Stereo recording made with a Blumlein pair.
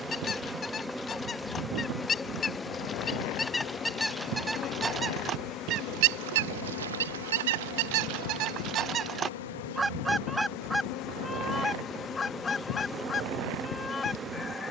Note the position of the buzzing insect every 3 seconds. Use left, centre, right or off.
centre, left, left, left, centre.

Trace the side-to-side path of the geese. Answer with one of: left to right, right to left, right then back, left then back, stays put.
right then back.